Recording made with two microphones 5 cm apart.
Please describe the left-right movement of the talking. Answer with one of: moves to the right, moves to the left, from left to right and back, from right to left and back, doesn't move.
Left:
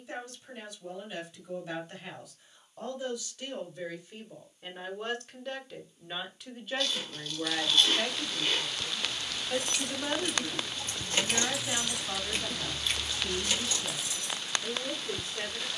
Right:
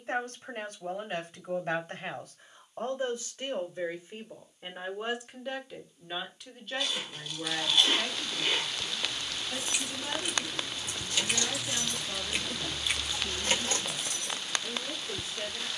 moves to the left.